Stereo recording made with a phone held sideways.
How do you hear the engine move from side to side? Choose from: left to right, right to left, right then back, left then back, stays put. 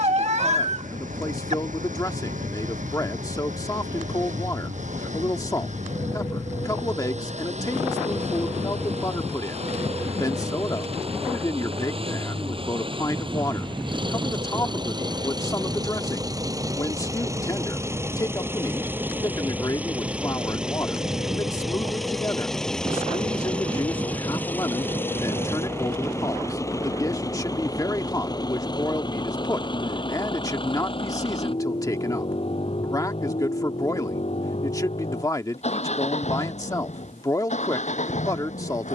right to left.